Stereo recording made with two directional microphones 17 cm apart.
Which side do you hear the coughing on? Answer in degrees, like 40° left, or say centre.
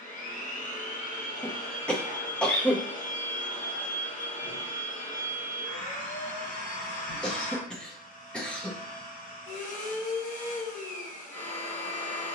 10° left.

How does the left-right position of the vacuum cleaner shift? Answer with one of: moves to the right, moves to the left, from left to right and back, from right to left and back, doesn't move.
doesn't move.